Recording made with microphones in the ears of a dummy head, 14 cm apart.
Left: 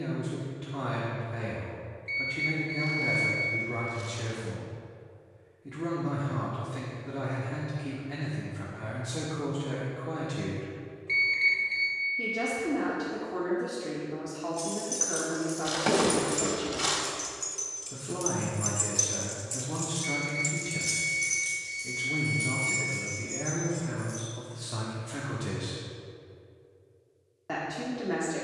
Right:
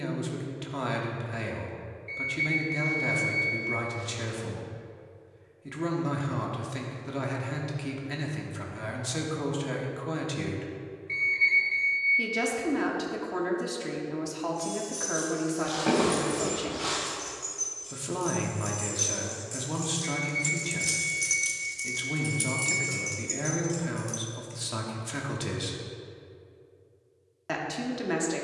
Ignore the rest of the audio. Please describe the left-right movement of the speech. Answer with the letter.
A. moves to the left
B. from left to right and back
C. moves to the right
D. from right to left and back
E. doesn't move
E.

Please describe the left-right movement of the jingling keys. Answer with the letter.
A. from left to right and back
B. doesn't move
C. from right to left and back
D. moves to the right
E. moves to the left
D.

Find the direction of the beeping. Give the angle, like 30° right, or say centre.
80° left.